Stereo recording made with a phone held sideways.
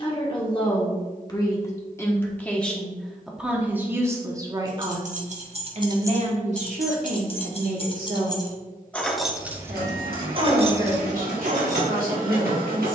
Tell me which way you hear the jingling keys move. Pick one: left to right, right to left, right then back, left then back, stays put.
left then back.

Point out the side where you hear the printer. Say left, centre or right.
right.